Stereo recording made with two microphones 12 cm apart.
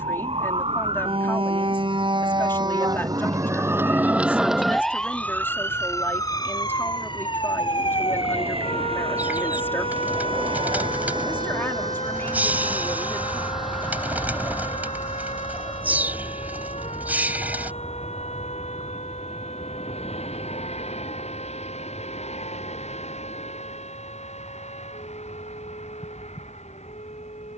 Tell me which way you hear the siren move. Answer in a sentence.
In this clip you hear the siren move from right to left.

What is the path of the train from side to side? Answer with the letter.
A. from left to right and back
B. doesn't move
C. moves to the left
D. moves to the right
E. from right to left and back
C.